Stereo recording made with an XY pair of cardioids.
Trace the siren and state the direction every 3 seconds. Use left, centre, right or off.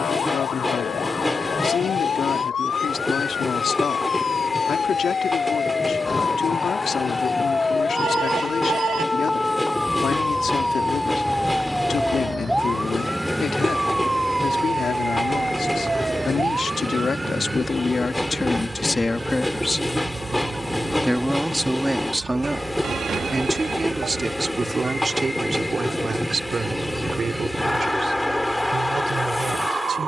left, left, left, centre, centre, right, right, right, right, right.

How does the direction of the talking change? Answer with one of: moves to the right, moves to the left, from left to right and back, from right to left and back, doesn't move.
moves to the right.